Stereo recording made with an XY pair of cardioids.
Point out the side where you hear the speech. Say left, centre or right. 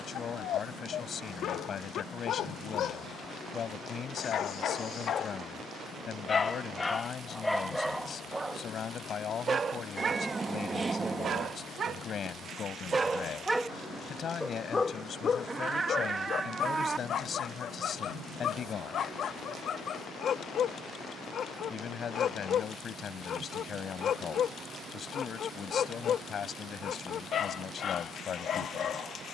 left.